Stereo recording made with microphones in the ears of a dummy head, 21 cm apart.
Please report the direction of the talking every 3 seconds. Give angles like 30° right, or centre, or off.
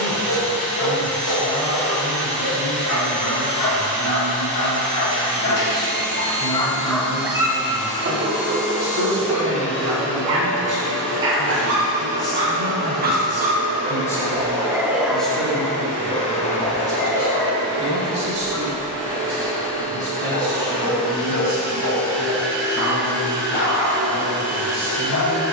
20° left, 20° left, 20° left, 20° left, 10° left, 10° right, 40° right, 50° right, 50° right.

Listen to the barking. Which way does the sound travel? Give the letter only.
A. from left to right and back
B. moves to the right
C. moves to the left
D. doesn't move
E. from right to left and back
A.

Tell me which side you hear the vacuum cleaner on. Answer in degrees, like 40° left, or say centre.
10° left.